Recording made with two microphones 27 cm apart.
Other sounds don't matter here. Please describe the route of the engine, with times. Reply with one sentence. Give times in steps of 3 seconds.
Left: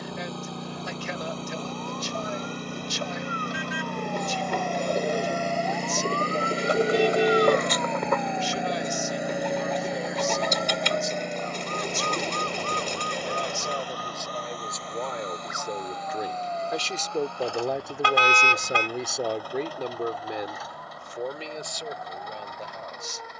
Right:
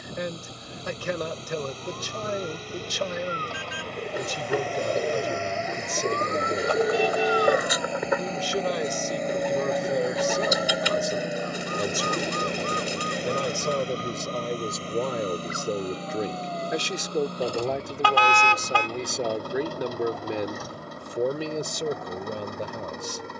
In this clip you hear the engine on the left from 0 s, in the centre from 9 s and on the right from 12 s.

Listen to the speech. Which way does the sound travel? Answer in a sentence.
You can hear the speech move from right to left and back again.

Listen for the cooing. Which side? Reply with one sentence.
You can hear the cooing in the centre.